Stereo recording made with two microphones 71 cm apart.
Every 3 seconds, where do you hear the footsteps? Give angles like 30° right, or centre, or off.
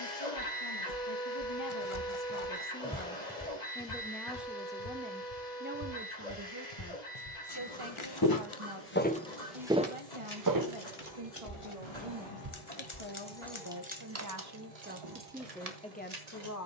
50° right, 40° left, 40° left, 20° right, 60° right, off.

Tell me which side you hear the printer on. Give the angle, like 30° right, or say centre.
70° left.